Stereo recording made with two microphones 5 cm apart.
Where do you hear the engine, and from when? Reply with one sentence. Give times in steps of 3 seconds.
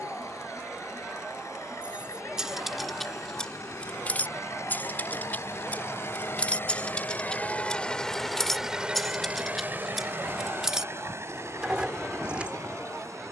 You can hear the engine on the left from 0 s and on the right from 9 s.